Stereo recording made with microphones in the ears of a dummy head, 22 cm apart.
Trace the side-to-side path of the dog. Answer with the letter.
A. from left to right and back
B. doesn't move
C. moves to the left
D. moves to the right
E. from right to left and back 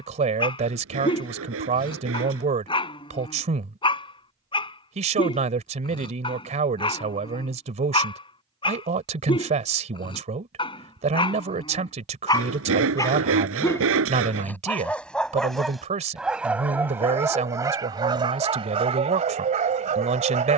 D.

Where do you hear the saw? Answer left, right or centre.
right.